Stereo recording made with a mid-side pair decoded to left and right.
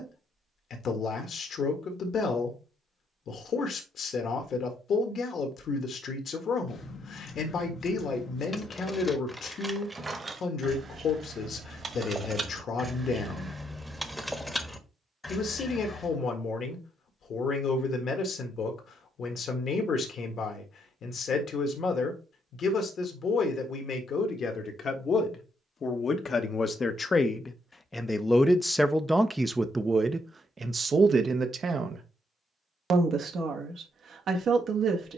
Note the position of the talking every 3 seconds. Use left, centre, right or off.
left, left, left, left, left, left, left, left, left, centre, right, right.